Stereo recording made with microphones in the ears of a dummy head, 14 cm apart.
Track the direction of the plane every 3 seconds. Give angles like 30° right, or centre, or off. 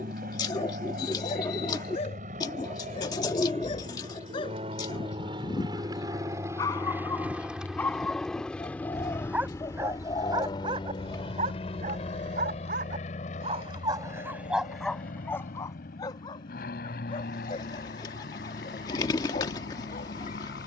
60° right, 40° right, 10° right, 30° left, 50° left, 60° left, 60° left.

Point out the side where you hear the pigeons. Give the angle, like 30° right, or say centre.
30° left.